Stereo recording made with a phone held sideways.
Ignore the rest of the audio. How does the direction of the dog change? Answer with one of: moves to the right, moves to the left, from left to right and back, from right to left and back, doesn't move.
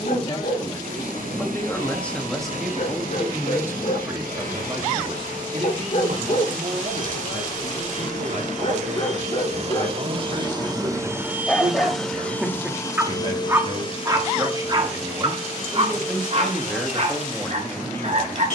moves to the right.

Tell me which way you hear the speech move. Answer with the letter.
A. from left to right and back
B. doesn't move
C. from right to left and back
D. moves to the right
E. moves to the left
A.